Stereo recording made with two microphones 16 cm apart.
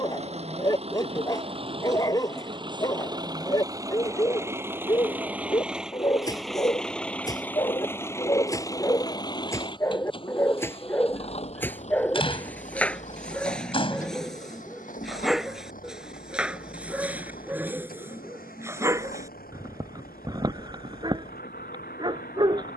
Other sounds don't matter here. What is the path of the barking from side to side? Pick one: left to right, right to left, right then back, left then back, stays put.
left to right.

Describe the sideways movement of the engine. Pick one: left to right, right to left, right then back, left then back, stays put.
right to left.